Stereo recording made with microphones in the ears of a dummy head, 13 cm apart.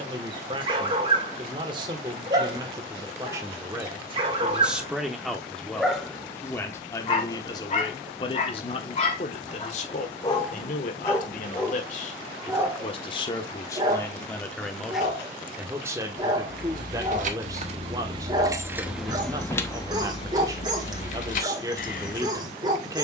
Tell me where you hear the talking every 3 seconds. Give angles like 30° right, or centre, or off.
30° right, 10° right, 30° left, 50° left, 20° left, 20° right, 20° right, 20° right.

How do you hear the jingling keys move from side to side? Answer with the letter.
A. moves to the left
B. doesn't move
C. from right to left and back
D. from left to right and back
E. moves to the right
A.